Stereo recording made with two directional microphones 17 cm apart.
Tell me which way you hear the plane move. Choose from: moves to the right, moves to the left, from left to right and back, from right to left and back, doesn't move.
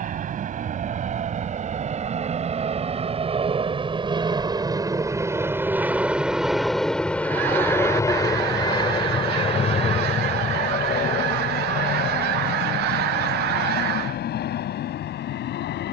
moves to the left.